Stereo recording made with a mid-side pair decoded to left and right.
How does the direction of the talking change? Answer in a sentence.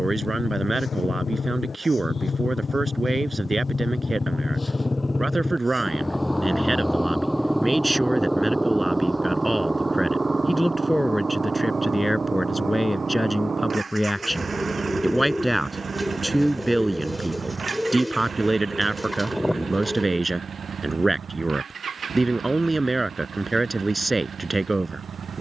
In this clip you hear the talking move from right to left and back again.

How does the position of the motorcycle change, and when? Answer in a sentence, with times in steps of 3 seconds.
In this clip you hear the motorcycle on the left from 0 s, in the centre from 6 s and on the right from 9 s.